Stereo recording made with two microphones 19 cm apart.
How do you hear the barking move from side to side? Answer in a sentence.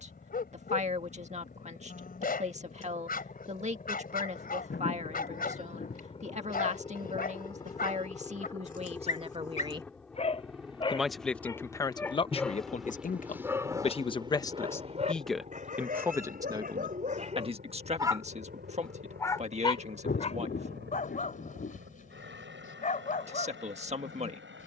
You can hear the barking go right and come back.